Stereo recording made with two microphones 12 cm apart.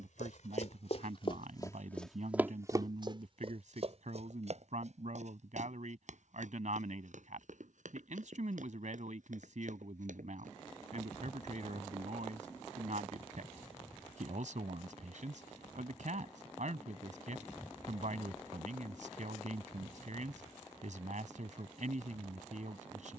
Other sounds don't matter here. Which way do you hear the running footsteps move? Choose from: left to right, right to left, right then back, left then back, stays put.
left to right.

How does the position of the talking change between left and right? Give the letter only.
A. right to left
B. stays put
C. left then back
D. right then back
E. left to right
B.